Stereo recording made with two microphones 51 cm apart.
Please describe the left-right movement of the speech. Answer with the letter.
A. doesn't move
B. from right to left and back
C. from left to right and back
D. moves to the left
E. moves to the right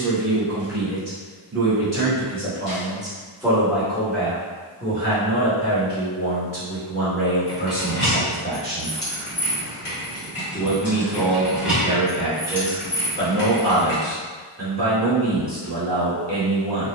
B.